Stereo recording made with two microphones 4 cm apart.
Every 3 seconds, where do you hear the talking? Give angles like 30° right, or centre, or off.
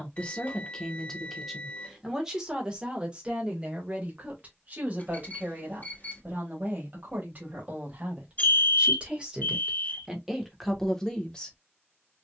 centre, 30° right, 30° right, centre.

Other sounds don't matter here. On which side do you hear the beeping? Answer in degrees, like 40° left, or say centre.
40° left.